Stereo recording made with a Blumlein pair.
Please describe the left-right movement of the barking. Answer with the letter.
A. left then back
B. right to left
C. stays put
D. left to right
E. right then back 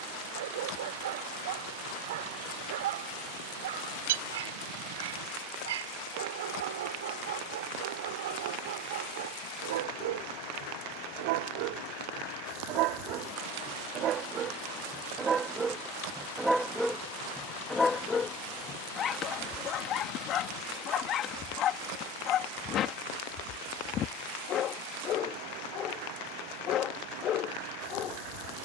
B.